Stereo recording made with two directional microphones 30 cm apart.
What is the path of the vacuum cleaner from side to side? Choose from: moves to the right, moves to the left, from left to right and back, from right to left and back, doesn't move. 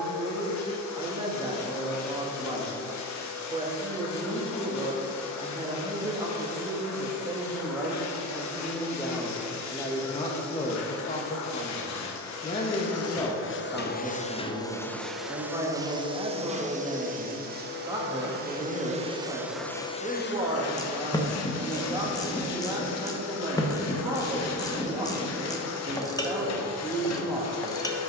from left to right and back.